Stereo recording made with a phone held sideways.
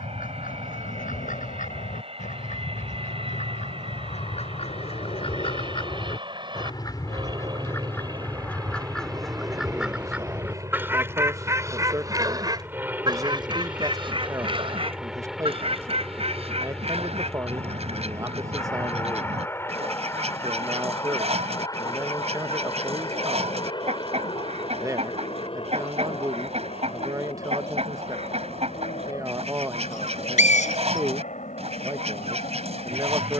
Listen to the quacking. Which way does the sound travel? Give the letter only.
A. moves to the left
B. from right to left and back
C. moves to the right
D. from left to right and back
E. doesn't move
C.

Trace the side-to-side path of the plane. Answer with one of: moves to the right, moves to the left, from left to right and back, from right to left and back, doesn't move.
moves to the left.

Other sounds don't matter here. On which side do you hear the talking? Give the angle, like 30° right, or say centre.
20° right.